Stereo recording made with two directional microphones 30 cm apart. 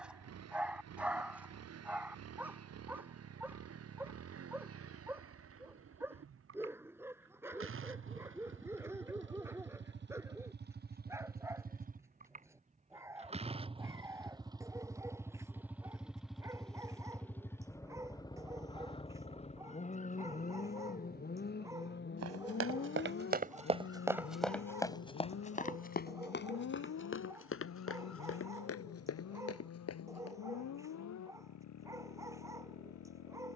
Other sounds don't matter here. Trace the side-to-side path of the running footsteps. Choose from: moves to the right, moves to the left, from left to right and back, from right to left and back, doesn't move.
moves to the left.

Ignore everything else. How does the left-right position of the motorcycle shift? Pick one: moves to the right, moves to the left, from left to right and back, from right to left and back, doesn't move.
moves to the left.